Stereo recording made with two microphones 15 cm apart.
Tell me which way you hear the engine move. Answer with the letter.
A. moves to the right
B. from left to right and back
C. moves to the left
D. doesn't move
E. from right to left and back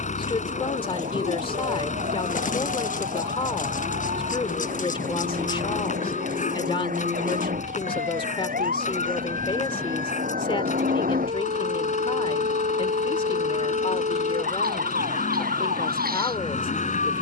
D.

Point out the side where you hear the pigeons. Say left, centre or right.
left.